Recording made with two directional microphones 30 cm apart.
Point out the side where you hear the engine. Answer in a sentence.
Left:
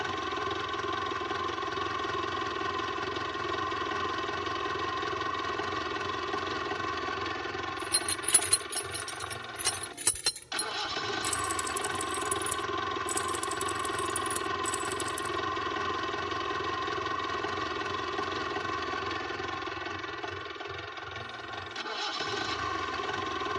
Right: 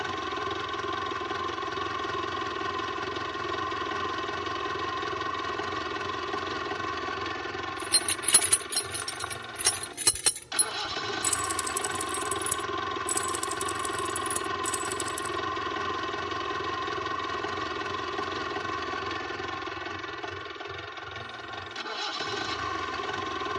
In this clip you hear the engine in the centre.